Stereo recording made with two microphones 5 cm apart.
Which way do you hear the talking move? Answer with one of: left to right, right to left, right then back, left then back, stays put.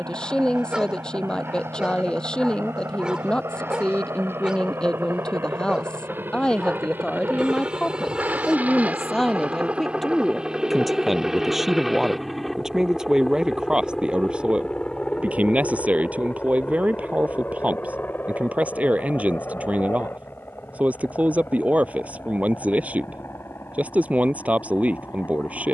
left to right.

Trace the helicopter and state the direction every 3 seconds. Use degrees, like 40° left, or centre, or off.
70° right, 60° right, 40° right, 20° right, 10° left, 30° left, 50° left, 50° left, 60° left.